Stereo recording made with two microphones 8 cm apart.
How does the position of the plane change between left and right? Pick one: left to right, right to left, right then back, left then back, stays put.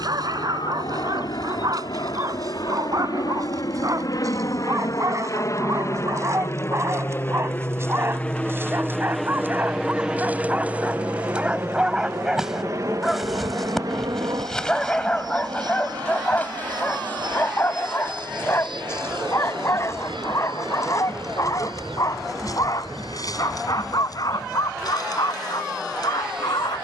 left to right.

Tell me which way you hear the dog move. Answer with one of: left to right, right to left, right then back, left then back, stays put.
right to left.